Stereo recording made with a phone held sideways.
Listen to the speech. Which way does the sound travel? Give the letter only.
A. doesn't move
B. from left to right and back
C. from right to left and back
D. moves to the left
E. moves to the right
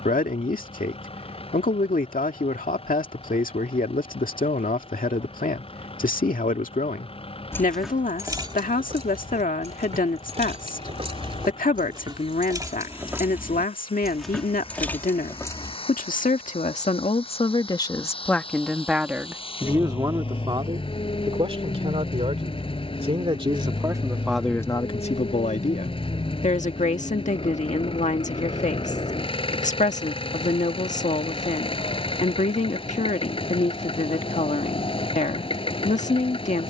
B.